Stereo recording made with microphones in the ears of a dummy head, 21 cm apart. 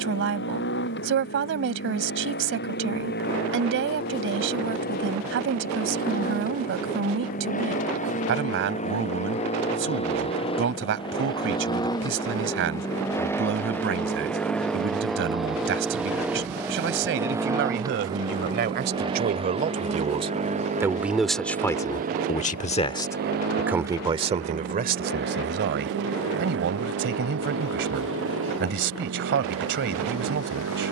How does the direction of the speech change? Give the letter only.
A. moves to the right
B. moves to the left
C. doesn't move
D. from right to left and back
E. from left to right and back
D.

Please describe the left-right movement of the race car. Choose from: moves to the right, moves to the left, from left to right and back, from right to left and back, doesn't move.
moves to the right.